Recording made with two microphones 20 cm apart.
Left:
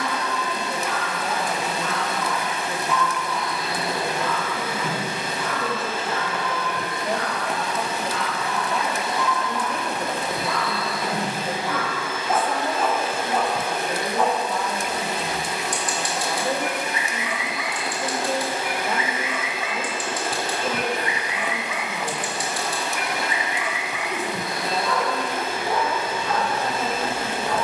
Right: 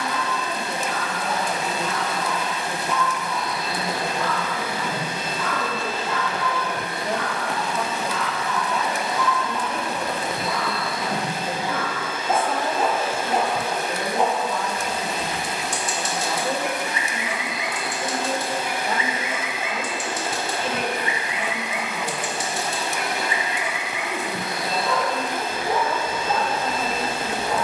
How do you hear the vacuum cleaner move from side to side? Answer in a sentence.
In this clip you hear the vacuum cleaner go left and come back.